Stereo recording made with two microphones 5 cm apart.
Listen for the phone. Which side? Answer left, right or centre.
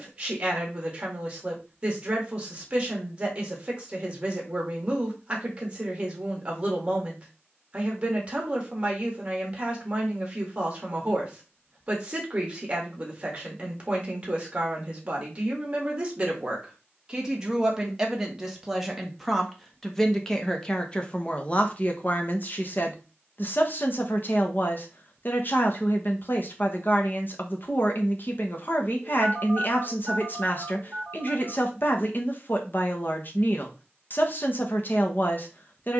right.